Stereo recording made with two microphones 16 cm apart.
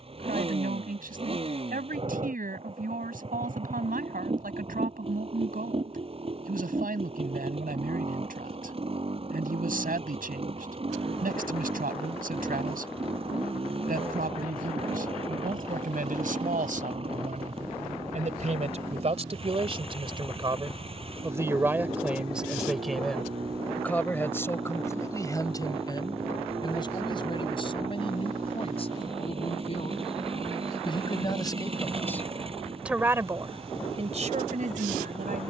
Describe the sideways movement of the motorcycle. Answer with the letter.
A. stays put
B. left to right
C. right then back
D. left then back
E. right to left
A.